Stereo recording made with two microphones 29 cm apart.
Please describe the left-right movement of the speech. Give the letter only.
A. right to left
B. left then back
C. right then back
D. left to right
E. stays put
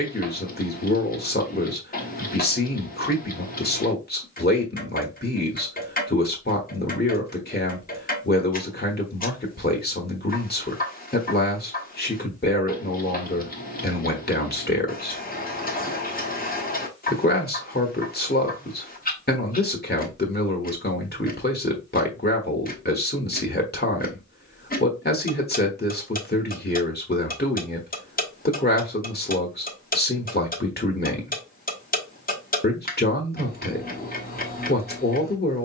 E.